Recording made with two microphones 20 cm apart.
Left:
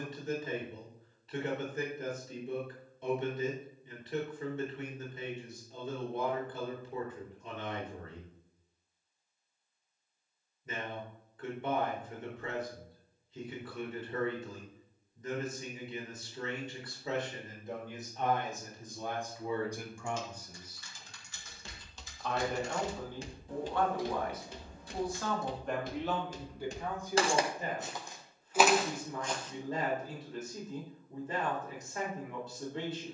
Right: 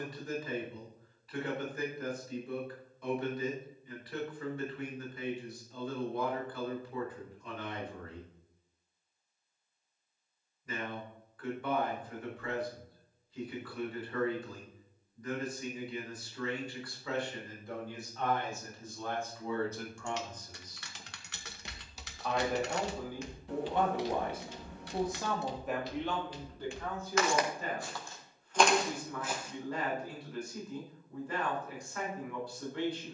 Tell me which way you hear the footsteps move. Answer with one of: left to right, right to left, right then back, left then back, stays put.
left then back.